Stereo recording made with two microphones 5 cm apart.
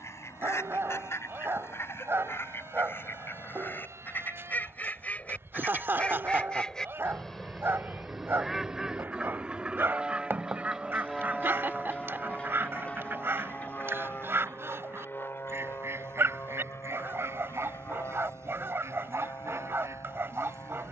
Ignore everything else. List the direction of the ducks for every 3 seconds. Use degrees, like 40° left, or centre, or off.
50° left, 30° left, centre, 30° right, 50° right, 60° right, 70° right.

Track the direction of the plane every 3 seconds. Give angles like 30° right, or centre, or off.
80° right, 70° right, 40° right, 10° right, 30° left, 50° left, 60° left.